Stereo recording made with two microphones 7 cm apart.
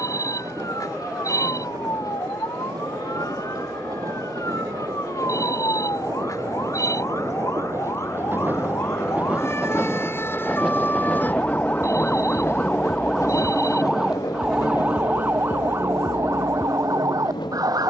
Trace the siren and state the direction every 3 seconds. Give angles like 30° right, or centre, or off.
60° left, 50° left, 40° left, 30° left, centre, 40° right.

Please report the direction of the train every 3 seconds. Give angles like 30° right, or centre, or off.
60° right, 50° right, 40° right, centre, 50° left, 70° left.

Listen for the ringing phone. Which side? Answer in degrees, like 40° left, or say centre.
50° left.